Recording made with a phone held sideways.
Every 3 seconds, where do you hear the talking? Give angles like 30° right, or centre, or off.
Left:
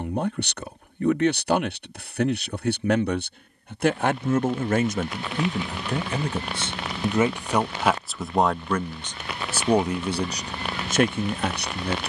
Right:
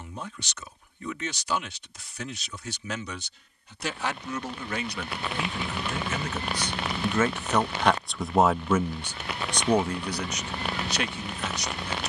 70° left, 50° left, 10° left, 40° left.